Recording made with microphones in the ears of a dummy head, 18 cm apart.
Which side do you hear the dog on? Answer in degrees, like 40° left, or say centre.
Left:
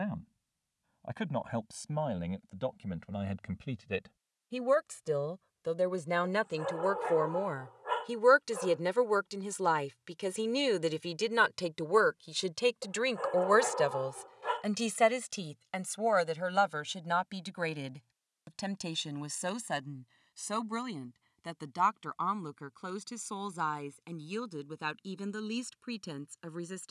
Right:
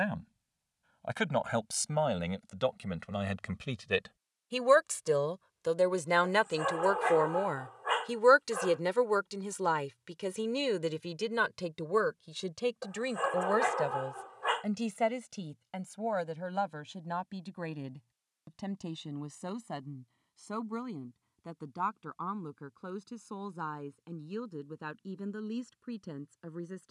50° right.